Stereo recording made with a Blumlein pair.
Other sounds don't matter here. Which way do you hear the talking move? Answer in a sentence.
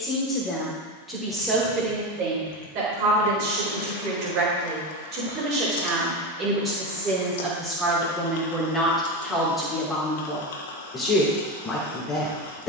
You can hear the talking go right and come back.